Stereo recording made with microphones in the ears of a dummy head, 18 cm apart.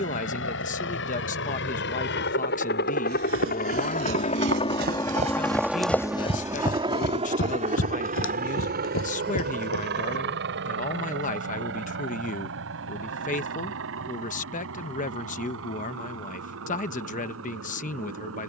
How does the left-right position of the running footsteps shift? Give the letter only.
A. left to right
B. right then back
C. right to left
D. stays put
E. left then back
C.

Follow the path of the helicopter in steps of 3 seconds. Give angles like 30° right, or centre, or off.
70° left, 30° left, 30° right, 50° right, 60° right, 70° right.